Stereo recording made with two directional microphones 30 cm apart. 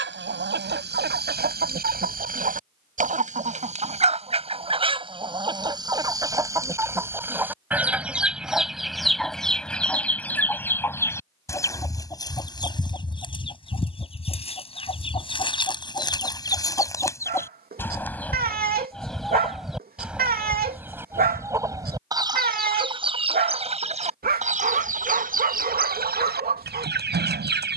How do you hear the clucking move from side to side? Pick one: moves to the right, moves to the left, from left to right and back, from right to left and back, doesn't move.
from right to left and back.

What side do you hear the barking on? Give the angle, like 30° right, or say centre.
30° right.